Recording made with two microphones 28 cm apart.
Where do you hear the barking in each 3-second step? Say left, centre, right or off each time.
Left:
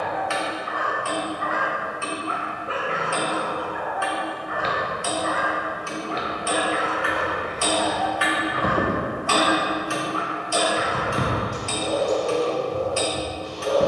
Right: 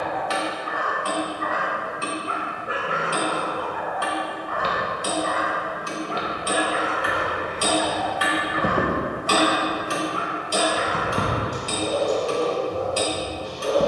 right, centre, centre, right, right.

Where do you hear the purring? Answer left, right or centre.
centre.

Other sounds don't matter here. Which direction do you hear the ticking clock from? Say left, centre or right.
right.